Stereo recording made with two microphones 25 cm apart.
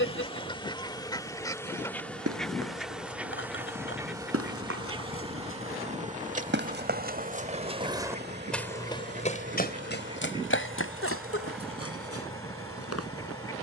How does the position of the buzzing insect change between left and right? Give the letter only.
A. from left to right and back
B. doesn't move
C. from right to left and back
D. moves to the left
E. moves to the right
E.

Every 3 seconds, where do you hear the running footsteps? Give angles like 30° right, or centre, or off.
70° right, 60° right, 20° right, 50° left, 70° left.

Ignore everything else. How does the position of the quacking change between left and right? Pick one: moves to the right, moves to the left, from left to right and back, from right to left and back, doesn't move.
from left to right and back.